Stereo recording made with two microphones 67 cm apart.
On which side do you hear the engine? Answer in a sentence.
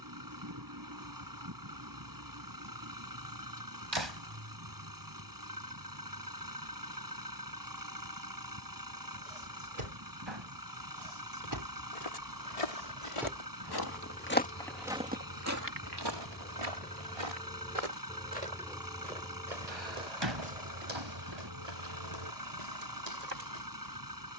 You can hear the engine on the right.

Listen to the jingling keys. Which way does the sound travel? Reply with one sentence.
In this clip you hear the jingling keys move from right to left and back again.